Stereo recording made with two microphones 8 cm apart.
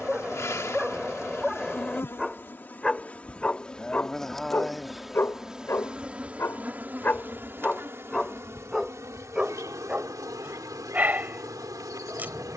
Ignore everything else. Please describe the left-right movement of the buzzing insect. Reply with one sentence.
You can hear the buzzing insect go from the left side to the right.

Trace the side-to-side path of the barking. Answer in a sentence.
In this clip you hear the barking move from right to left and back again.